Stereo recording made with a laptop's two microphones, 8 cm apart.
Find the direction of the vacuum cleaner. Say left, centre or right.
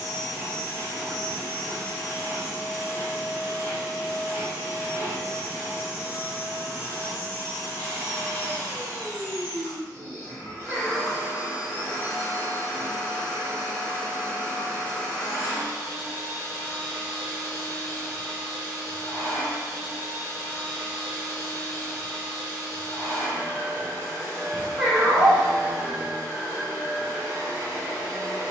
left.